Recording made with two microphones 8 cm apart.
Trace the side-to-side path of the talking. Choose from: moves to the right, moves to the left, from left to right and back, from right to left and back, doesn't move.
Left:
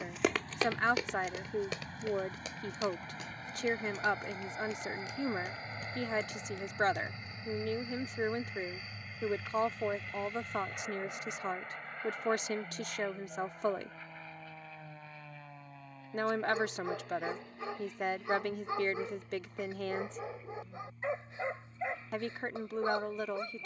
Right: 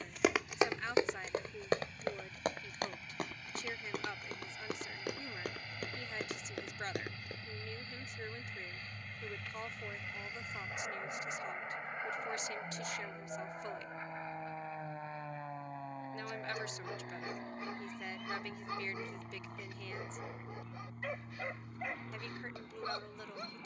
doesn't move.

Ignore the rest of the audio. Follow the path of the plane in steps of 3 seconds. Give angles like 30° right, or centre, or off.
50° left, 40° left, 20° left, centre, 20° right, 30° right, 40° right, 50° right.